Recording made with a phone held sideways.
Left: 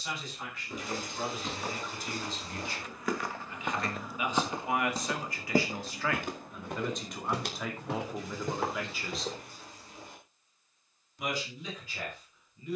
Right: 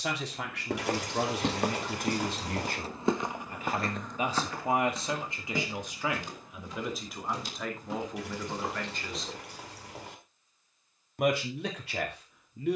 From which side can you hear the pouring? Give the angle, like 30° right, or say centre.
70° right.